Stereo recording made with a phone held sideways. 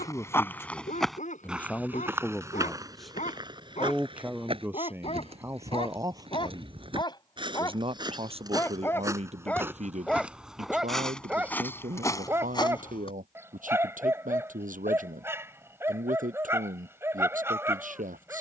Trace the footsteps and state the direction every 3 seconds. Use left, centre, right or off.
centre, right, right, centre, left, off.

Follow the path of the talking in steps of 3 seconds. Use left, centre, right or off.
centre, centre, right, right, right, right.